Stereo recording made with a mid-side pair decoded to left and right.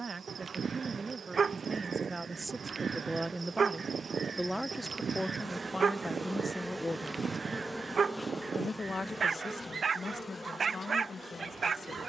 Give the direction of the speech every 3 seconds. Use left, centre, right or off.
right, centre, left, left.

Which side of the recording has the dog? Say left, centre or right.
right.